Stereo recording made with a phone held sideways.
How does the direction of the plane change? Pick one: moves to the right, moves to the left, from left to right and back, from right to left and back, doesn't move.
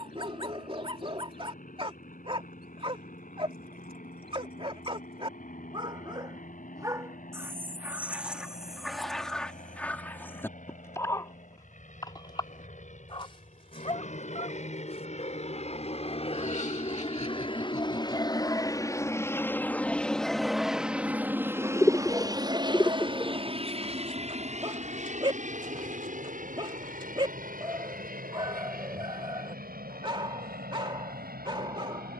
moves to the right.